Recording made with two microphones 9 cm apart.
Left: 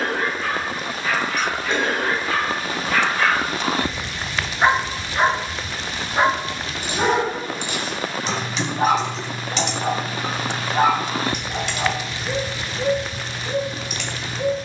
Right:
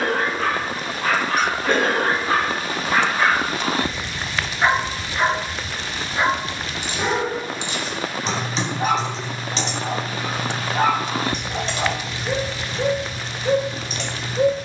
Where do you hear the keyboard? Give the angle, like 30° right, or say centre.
30° right.